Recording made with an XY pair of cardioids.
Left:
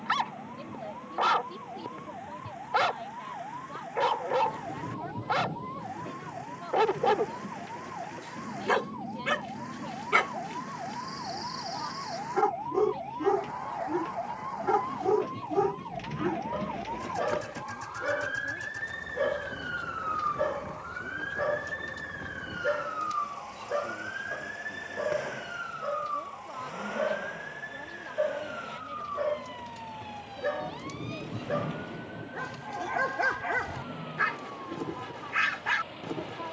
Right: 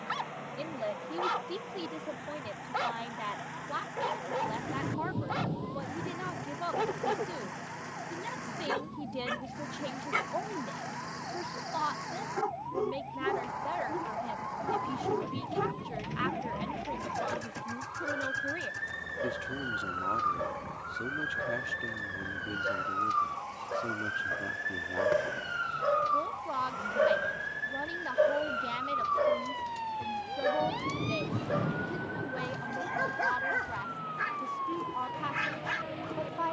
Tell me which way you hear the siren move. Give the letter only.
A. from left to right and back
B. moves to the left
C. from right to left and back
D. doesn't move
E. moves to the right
E.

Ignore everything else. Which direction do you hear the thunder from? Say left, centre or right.
right.